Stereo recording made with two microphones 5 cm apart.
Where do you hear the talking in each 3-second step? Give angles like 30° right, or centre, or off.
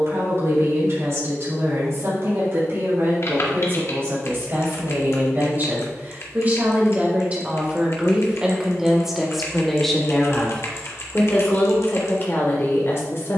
50° right, 40° right, 20° right, 20° left, 50° left.